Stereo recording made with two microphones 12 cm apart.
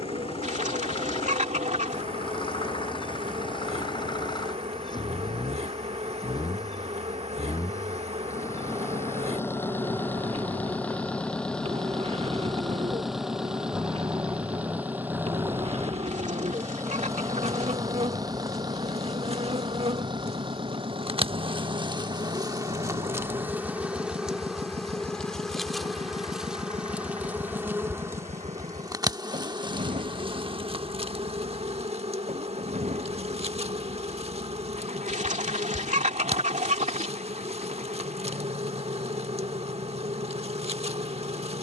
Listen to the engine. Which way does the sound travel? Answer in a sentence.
In this clip you hear the engine travel towards the right.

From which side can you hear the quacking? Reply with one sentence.
In this clip you hear the quacking on the right.